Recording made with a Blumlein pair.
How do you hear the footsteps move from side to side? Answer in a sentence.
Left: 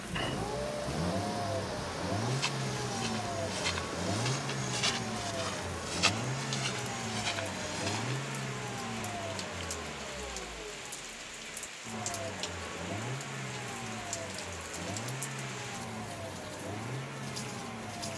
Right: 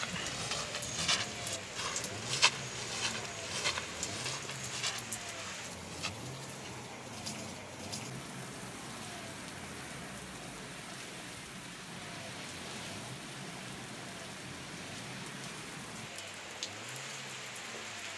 In this clip you hear the footsteps move to the left.